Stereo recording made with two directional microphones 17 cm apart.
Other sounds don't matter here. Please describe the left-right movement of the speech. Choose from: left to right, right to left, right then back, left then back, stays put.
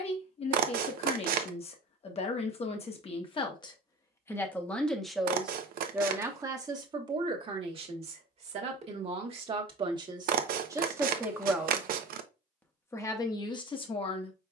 right then back.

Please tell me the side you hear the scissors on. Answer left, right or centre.
right.